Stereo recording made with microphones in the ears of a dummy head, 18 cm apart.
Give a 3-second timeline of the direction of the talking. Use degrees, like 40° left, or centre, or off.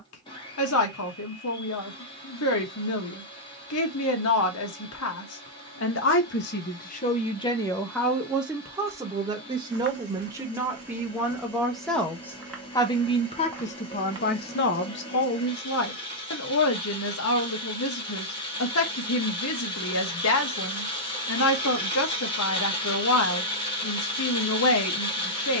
80° left, 80° left, 20° left, 10° right, 30° left, 70° left, 70° left, 70° left, 70° left.